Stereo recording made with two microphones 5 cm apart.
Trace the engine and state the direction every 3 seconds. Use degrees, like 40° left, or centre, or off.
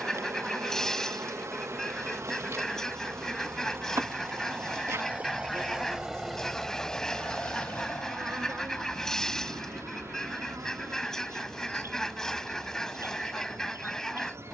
60° right, 40° right, 30° left, 70° left, 80° left.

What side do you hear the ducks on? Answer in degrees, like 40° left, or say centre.
10° left.